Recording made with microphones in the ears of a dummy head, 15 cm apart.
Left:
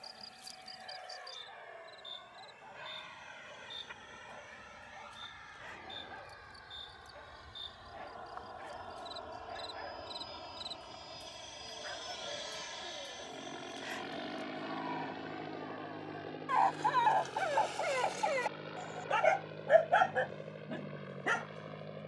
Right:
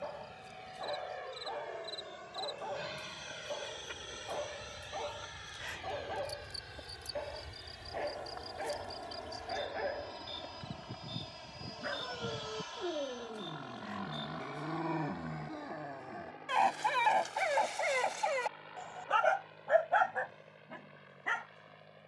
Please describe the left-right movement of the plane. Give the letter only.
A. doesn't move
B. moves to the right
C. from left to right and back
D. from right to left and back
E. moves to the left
E.